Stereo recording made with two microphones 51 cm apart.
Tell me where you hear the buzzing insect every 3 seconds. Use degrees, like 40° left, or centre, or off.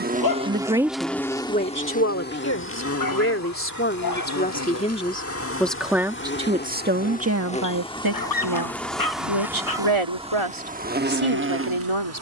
10° left, 30° left, 10° left, 10° right.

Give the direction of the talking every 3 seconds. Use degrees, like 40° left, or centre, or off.
10° left, 20° left, 30° right, 70° right.